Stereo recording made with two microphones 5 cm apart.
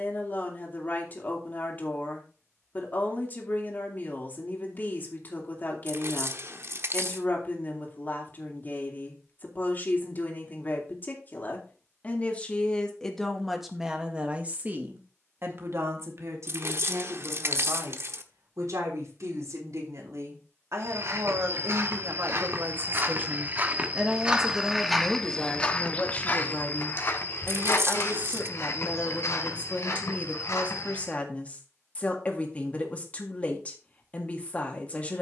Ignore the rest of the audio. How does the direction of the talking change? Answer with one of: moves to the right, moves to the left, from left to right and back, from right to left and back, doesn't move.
from left to right and back.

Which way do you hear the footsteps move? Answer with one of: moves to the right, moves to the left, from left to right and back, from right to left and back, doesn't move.
moves to the left.